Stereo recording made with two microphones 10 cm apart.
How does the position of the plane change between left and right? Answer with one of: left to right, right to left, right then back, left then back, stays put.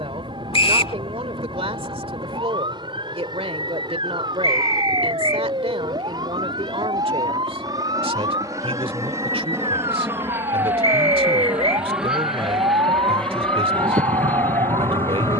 right to left.